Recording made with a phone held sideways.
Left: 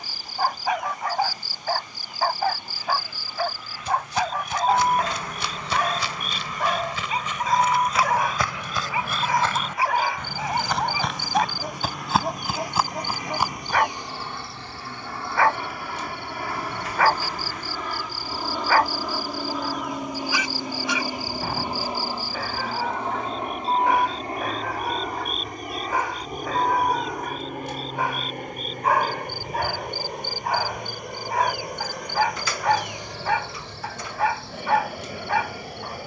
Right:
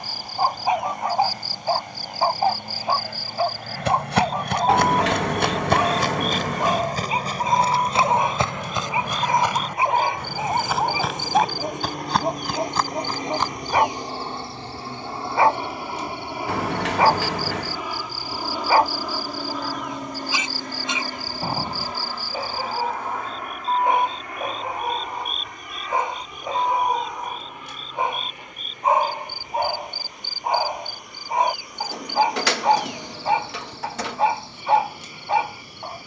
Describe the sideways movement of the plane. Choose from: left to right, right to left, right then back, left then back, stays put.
right to left.